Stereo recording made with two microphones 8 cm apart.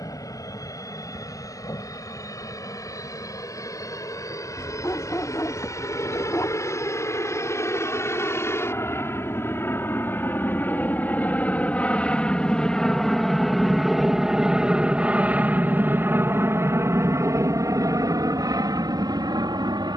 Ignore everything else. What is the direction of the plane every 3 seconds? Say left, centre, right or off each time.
left, left, left, left, centre, right, right.